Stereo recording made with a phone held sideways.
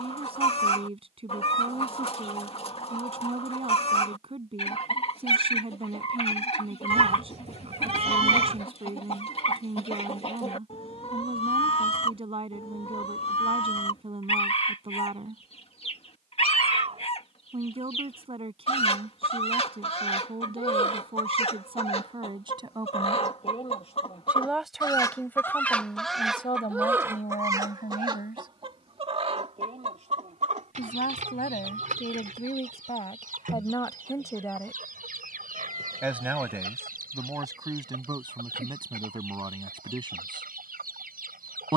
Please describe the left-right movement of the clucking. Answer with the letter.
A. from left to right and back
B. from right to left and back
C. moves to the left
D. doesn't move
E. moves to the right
E.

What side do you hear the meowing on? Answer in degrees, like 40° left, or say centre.
40° right.